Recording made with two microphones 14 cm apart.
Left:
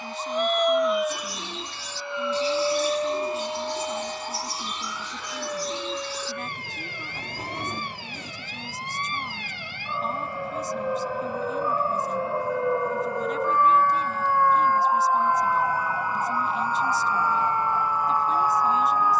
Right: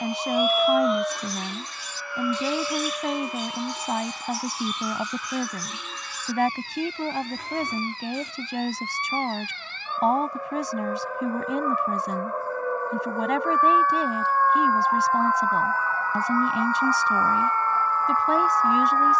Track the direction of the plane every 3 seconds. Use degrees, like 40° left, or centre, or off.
10° left, 50° left, 60° left, 70° left, 70° left, 70° left, 70° left.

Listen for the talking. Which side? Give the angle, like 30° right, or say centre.
80° right.